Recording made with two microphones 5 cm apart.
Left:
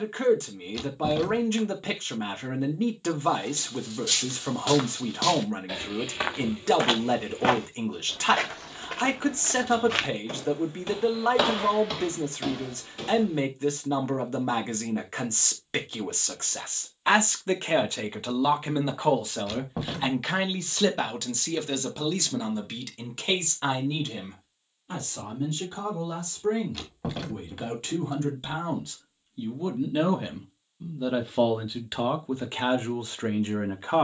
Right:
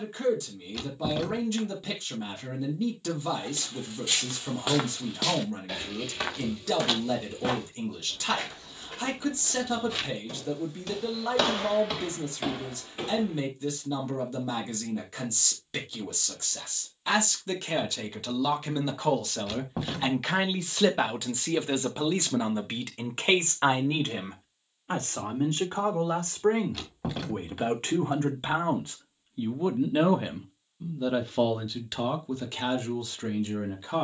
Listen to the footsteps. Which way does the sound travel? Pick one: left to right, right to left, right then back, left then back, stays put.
left then back.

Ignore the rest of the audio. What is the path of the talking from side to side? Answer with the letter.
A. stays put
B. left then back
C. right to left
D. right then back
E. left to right
D.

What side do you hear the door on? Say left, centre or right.
centre.